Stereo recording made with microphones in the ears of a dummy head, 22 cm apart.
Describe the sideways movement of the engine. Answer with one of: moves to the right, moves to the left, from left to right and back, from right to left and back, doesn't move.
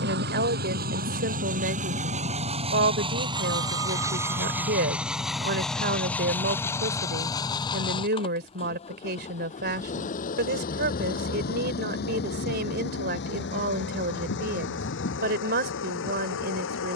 moves to the left.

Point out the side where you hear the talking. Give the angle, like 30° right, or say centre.
40° right.